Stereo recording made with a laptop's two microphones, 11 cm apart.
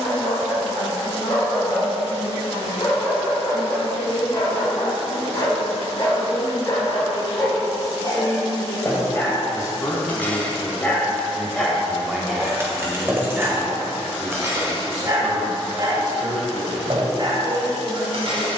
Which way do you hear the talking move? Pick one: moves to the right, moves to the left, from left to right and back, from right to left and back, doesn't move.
moves to the right.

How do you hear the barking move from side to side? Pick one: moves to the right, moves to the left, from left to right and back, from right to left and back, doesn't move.
moves to the right.